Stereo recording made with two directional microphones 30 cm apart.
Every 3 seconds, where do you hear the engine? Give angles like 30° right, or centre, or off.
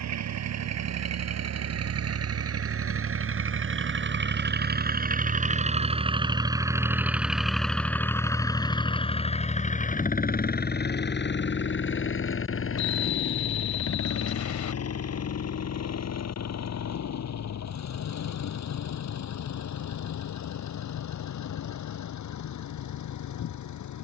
60° right, 30° right, centre, 30° left, 50° left, 60° left, 60° left, 70° left.